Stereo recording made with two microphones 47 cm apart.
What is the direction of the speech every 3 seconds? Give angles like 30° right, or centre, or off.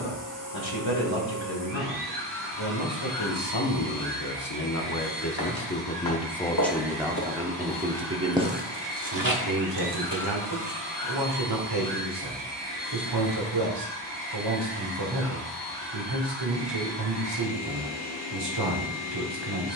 60° left, 40° left, 10° right, 50° right, 50° right, 50° right, 50° right.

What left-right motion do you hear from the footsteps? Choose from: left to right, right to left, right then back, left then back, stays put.
left to right.